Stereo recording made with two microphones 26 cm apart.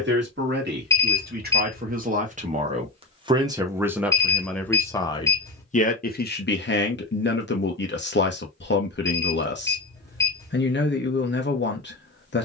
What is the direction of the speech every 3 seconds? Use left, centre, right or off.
right, centre, left, left.